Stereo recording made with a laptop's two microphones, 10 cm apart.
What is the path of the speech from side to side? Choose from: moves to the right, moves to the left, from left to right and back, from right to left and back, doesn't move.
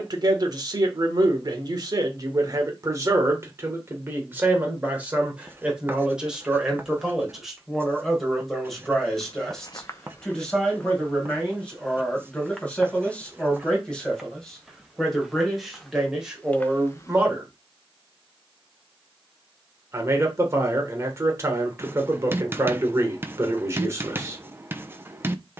from right to left and back.